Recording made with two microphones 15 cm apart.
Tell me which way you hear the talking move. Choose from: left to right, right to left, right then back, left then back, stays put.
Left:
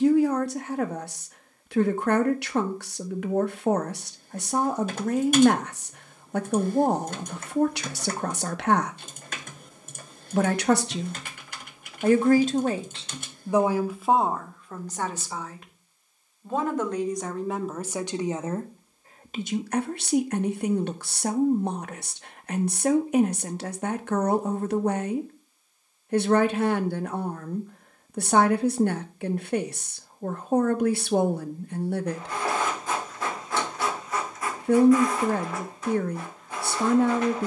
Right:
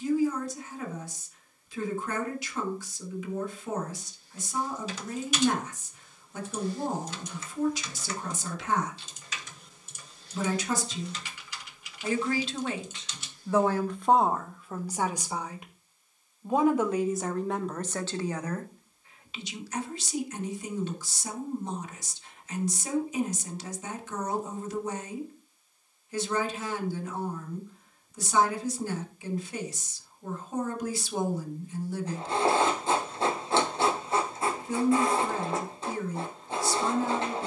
right then back.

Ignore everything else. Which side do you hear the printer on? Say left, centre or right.
right.